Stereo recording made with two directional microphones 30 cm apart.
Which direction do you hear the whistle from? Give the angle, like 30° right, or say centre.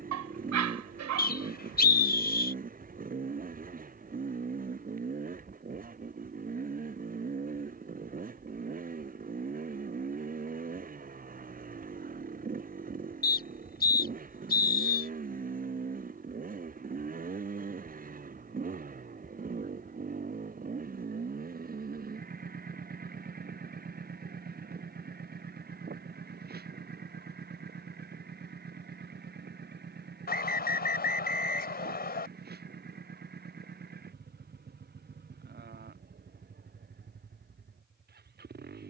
30° left.